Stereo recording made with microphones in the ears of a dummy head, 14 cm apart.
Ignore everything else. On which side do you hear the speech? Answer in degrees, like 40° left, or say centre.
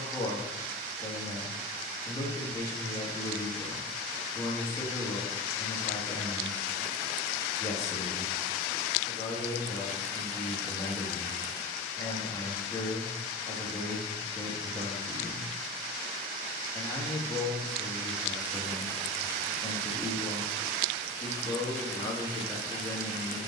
20° left.